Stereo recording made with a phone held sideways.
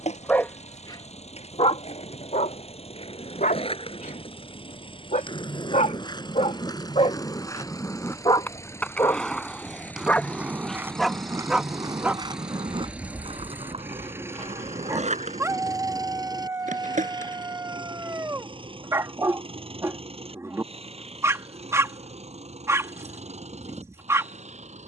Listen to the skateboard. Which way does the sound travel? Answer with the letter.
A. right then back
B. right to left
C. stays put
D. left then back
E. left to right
E.